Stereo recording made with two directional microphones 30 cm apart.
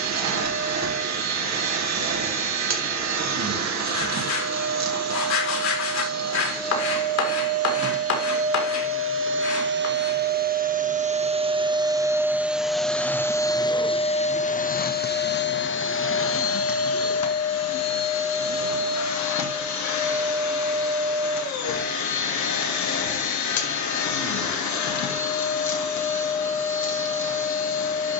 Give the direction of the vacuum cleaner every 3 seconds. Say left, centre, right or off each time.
right, right, right, right, centre, left, left, left, left, left.